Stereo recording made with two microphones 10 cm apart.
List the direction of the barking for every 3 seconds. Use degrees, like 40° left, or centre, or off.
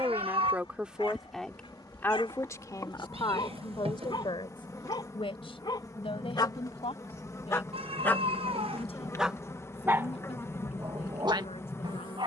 60° left, 50° left, 30° left, 30° right.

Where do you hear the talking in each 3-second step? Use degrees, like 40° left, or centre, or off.
10° left, 60° left, 70° left, 80° left.